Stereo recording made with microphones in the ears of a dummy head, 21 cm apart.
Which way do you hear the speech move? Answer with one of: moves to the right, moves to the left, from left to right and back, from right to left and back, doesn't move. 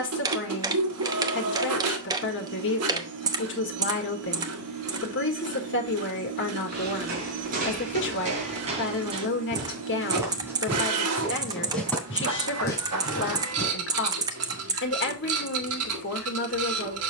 doesn't move.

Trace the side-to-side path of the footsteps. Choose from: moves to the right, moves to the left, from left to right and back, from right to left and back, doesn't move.
moves to the left.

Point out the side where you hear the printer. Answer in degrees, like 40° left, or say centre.
80° right.